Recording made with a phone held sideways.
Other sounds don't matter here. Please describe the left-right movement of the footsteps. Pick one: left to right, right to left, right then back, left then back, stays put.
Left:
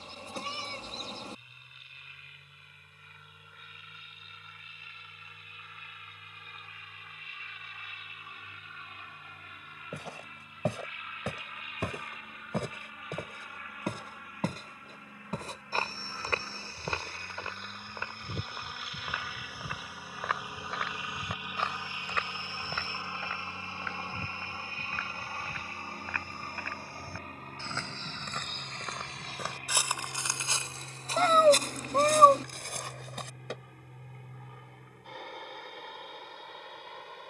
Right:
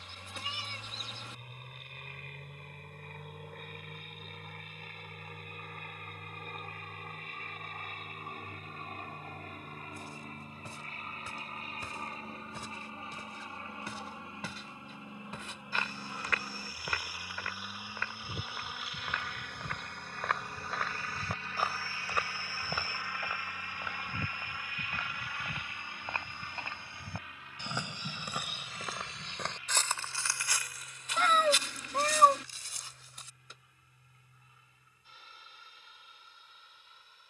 right then back.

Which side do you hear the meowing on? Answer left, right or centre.
left.